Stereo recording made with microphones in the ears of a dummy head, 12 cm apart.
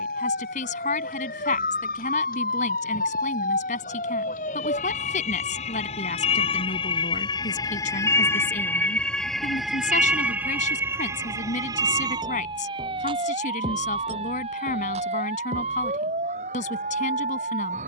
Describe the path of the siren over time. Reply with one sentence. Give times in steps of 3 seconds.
In this clip you hear the siren on the left from 0 s, in the centre from 9 s and on the right from 12 s.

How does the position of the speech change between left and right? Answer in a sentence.
You can hear the speech stay put.